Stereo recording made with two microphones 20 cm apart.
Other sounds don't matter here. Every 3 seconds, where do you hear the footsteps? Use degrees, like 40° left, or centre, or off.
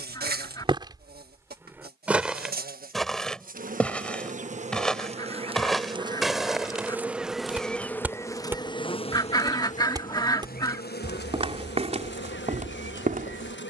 10° right, centre, 10° right, 30° right, 40° right.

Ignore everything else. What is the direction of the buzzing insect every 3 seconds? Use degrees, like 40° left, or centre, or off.
50° right, 40° right, centre, 50° left, 60° left.